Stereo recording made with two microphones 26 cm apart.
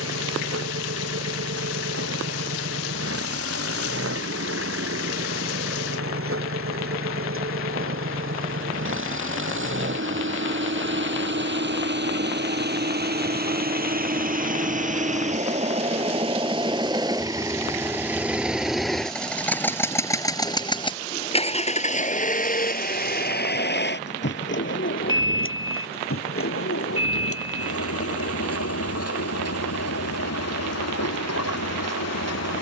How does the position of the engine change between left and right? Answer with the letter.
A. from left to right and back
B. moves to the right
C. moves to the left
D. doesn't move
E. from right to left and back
C.